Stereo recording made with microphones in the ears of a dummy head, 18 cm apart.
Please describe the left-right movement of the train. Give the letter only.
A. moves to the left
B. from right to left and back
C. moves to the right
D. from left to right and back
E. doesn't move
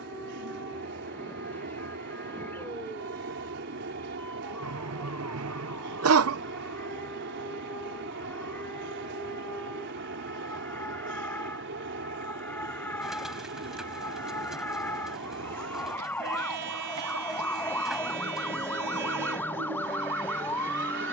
E.